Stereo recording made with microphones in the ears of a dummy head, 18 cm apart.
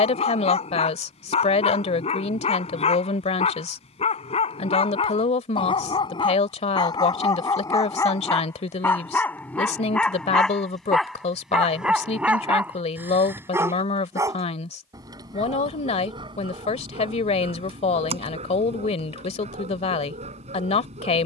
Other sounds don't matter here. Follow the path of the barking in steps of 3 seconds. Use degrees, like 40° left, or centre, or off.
30° left, 30° left, 20° left, centre, 10° right, 30° right, 40° right.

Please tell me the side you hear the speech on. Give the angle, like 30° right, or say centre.
30° left.